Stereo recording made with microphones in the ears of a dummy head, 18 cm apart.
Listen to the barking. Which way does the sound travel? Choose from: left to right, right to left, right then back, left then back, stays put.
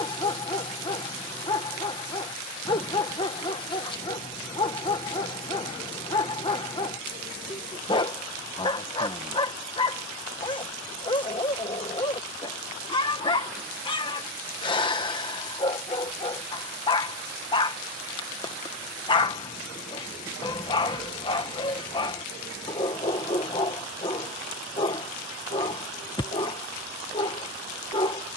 stays put.